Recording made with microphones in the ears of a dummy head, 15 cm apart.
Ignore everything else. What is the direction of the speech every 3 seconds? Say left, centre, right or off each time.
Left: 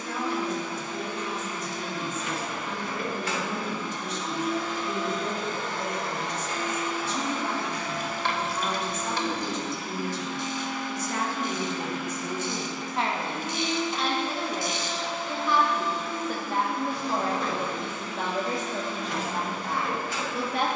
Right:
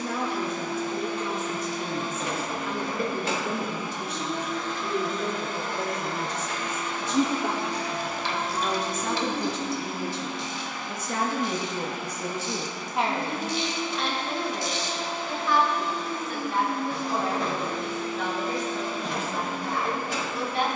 right, right, right, right, centre, left, left.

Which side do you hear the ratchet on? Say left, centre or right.
left.